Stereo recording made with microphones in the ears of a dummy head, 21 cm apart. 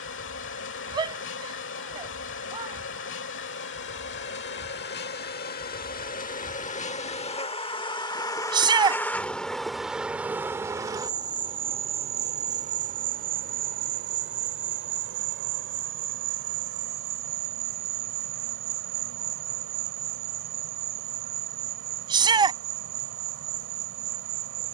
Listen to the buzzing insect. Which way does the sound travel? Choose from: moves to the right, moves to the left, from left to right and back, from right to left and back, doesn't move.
moves to the right.